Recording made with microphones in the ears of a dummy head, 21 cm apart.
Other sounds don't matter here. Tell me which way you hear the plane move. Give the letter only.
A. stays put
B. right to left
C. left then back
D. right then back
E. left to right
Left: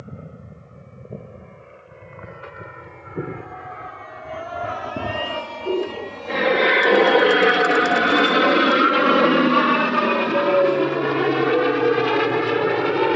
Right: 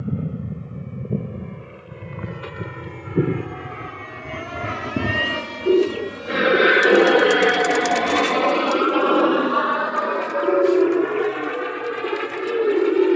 B.